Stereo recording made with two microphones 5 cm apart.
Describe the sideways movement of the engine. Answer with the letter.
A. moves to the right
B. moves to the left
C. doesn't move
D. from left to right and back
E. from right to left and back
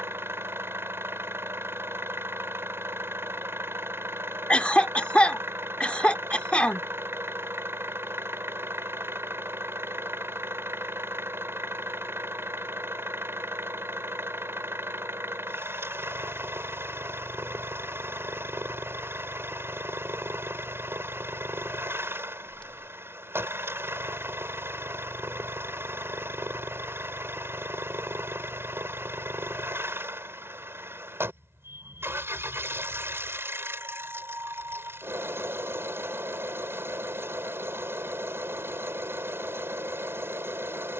C.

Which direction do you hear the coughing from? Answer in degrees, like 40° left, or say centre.
30° left.